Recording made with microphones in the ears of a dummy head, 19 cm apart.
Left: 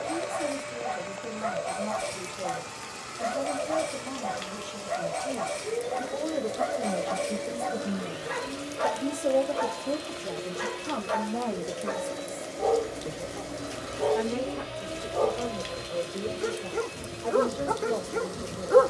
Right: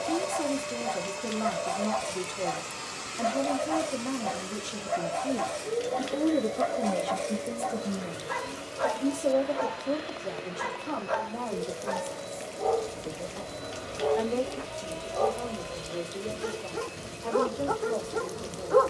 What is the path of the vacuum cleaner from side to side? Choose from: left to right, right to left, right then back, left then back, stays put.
right to left.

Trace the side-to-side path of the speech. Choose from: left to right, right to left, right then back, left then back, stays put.
right to left.